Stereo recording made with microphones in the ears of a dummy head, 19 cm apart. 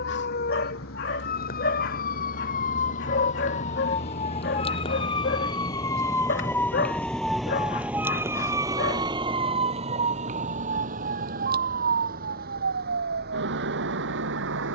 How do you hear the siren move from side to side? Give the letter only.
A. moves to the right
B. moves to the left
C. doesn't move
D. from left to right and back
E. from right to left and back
A.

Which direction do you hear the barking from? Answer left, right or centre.
left.